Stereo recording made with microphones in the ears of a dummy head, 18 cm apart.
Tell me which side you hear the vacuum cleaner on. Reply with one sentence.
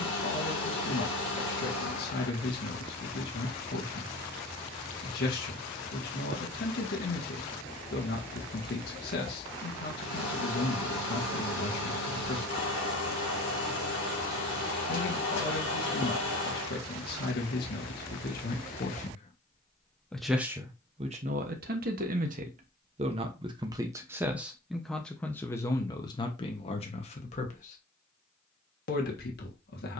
In this clip you hear the vacuum cleaner on the left.